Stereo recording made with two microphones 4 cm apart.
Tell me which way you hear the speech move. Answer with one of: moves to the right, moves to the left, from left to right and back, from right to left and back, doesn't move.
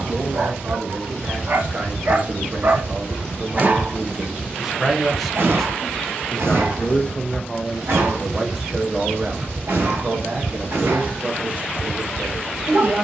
from right to left and back.